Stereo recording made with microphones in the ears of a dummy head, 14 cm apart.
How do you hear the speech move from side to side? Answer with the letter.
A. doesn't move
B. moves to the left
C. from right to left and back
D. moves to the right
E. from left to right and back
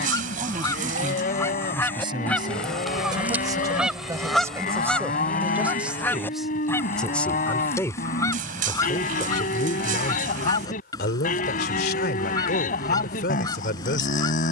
B.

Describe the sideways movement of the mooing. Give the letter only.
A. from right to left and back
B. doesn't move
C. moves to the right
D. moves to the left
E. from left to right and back
B.